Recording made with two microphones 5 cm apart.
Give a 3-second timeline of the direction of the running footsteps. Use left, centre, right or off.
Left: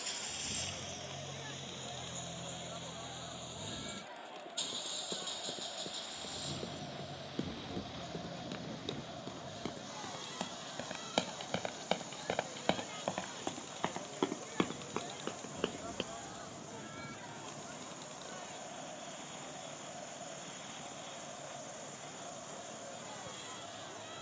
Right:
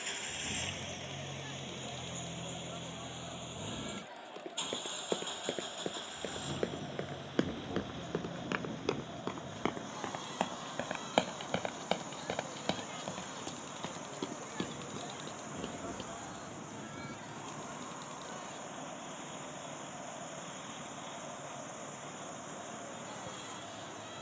off, right, right, right, left, left, off, off.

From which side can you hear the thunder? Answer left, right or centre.
right.